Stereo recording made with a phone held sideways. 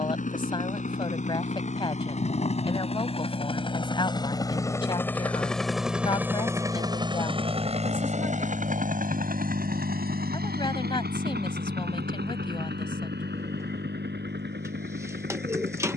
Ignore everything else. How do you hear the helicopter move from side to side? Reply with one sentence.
You can hear the helicopter move from left to right.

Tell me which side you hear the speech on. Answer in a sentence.
In this clip you hear the speech on the left.